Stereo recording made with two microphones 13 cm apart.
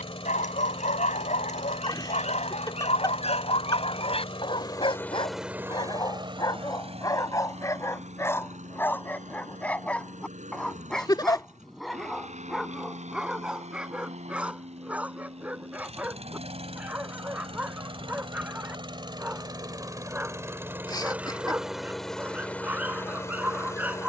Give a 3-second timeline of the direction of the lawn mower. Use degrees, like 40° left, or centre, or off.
50° left, 20° left, 60° right, 70° right, 60° right, 50° right, 30° right, 10° left.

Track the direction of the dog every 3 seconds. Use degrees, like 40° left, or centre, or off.
60° left, 40° left, 20° left, 10° left, 10° right, 10° right, 10° right, 10° right.